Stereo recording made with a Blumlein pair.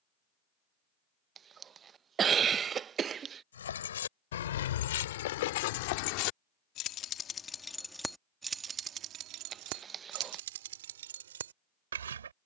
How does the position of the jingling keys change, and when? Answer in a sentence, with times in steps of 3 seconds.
You can hear the jingling keys not at all from 0 s, on the left from 3 s, in the centre from 6 s and on the right from 9 s.